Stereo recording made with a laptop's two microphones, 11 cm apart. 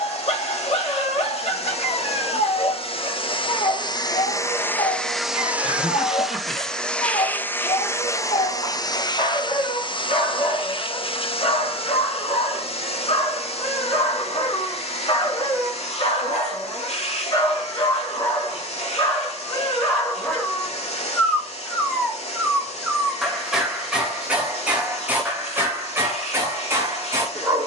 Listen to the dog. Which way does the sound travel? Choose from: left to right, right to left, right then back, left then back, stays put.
left to right.